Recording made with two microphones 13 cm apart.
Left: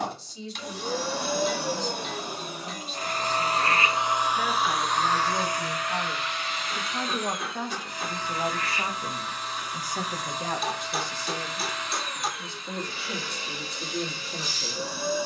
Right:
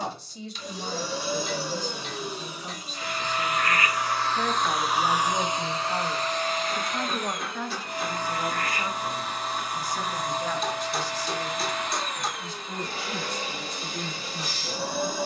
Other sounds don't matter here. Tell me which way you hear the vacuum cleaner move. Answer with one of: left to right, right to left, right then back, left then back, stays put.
left to right.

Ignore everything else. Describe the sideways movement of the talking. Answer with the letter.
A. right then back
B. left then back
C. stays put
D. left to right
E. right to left
E.